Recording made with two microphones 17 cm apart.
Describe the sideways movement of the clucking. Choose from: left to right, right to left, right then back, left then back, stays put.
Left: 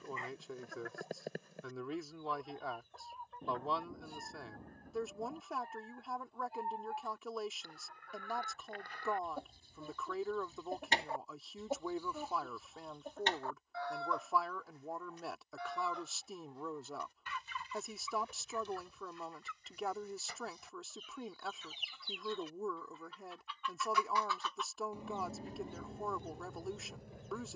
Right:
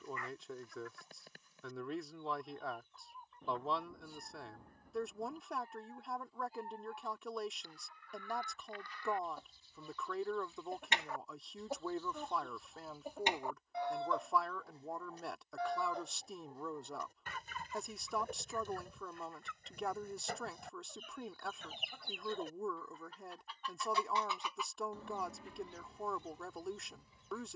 right then back.